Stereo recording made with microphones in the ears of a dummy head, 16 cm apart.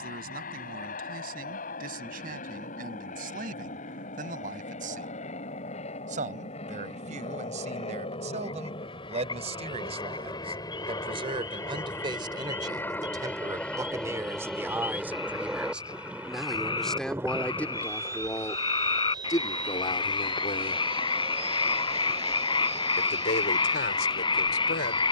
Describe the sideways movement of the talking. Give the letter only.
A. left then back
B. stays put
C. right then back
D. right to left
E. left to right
D.